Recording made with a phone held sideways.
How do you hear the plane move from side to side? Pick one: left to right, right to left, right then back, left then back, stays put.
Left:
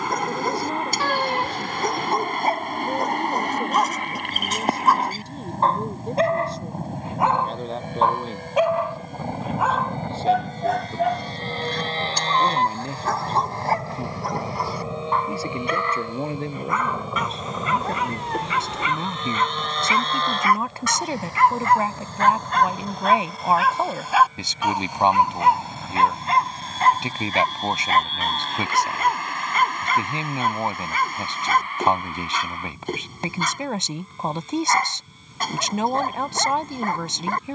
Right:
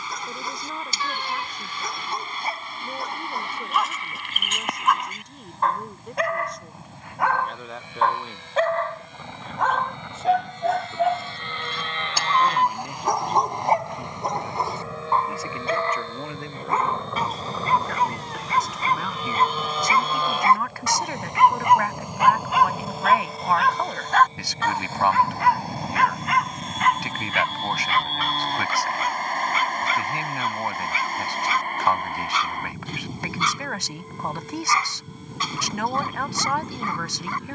left to right.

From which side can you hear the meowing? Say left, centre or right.
left.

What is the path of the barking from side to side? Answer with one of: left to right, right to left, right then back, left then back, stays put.
right then back.